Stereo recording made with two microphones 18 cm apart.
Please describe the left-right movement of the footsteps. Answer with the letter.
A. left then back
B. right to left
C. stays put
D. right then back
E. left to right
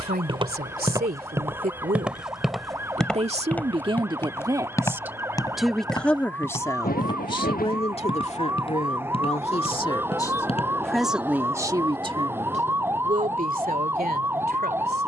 B.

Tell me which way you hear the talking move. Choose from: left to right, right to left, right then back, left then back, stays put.
left then back.